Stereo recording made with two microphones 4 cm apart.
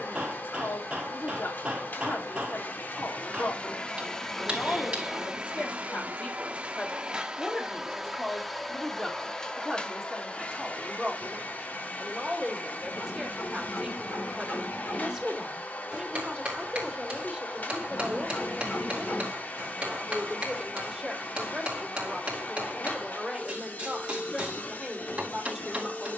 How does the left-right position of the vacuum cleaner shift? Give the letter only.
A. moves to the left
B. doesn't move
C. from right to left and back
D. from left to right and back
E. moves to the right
D.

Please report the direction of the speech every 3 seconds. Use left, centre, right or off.
left, left, left, centre, centre, centre, centre, centre, centre.